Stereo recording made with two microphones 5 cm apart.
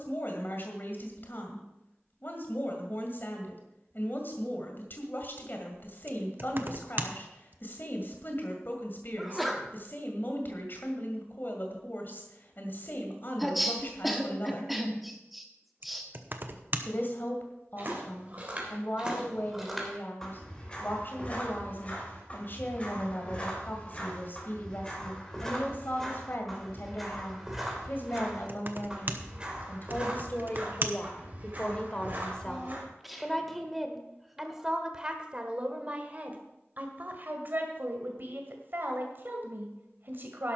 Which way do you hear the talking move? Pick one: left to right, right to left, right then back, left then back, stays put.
left to right.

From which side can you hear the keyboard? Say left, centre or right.
right.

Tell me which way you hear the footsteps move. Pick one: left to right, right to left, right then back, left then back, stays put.
left then back.